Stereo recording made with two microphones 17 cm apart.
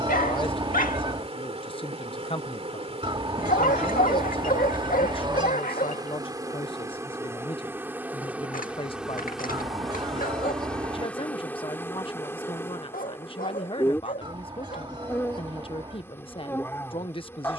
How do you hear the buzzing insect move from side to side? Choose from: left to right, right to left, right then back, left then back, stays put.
right to left.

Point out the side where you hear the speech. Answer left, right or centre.
left.